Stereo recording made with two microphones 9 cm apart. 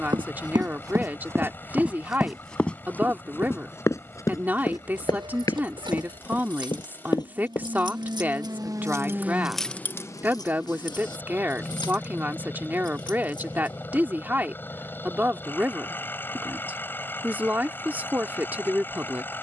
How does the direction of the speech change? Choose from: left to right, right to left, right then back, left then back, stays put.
stays put.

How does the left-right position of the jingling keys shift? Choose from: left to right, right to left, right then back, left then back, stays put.
right to left.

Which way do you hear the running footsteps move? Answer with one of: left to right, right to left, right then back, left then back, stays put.
right to left.